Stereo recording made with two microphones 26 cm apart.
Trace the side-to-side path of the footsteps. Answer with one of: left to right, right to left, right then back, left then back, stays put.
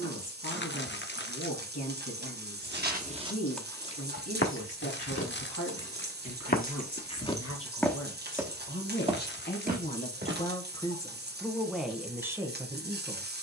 left then back.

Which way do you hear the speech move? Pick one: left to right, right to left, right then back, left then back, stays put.
left to right.